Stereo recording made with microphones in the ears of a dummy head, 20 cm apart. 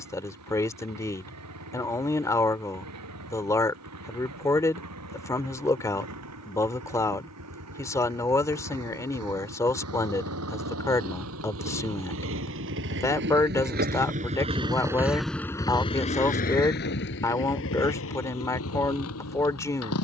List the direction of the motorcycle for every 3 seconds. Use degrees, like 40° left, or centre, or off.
80° right, 80° right, 80° right, 70° right, 40° right, 40° left, 70° left.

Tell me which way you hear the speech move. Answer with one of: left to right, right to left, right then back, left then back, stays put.
stays put.